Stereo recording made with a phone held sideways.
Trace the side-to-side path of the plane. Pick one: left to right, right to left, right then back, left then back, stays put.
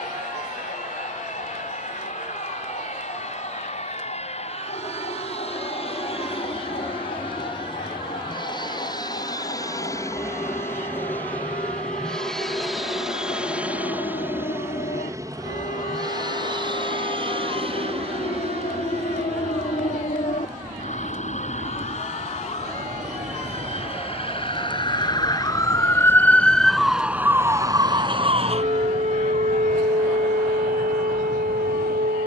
left to right.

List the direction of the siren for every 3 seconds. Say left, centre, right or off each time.
left, left, left, left, left, left, left, left, left, right, right.